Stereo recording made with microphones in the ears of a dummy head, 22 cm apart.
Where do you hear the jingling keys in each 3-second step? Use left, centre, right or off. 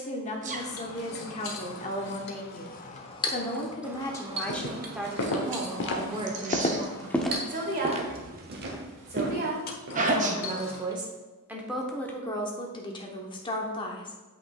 left, right, right, left, off.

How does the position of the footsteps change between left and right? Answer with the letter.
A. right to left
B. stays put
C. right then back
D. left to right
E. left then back
D.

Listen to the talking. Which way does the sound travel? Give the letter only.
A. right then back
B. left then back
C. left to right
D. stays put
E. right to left
A.